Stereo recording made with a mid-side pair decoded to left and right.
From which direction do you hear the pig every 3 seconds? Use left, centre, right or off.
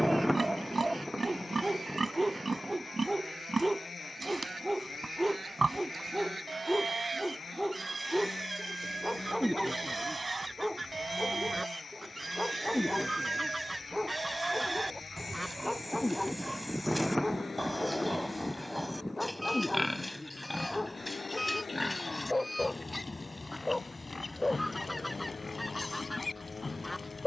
right, right, right, right, right, centre, centre, left, left.